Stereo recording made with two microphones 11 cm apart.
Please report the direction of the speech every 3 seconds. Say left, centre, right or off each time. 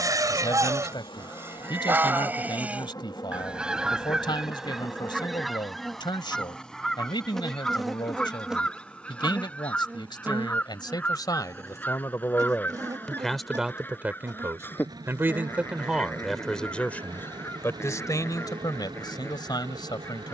left, left, left, left, centre, centre, left.